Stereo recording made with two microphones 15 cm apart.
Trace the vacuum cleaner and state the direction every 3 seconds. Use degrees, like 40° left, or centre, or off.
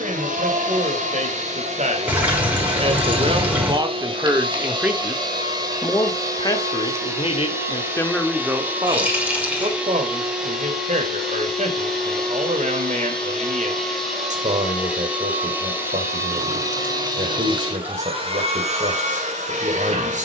50° right, 30° right, 20° right, centre, centre, 20° right, 50° right.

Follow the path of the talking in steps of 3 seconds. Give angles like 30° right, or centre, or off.
50° right, 20° right, 20° left, 50° right, 50° right, 50° right, 50° right.